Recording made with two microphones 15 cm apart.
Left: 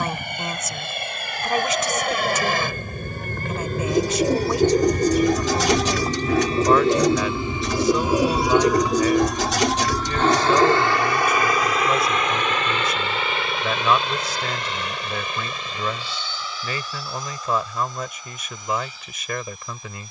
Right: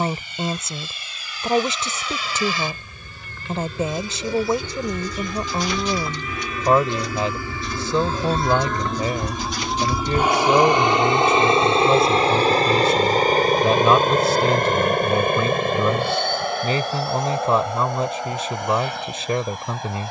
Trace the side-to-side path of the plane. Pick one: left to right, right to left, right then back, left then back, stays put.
left to right.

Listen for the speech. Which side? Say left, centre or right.
right.